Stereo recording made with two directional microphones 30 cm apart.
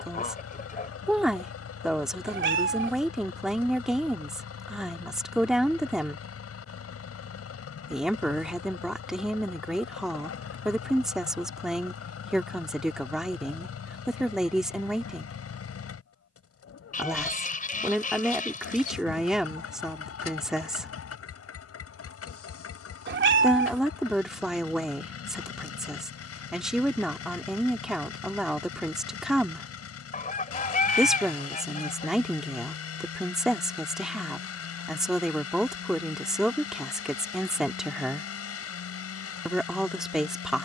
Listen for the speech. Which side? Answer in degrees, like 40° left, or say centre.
centre.